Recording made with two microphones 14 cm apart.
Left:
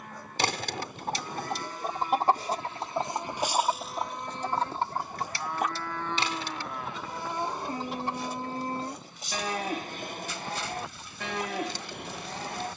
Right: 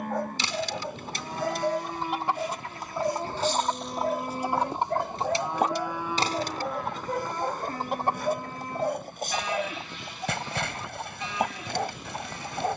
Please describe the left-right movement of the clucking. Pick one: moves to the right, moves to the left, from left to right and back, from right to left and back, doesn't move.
moves to the right.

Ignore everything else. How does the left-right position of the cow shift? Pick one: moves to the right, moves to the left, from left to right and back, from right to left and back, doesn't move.
moves to the left.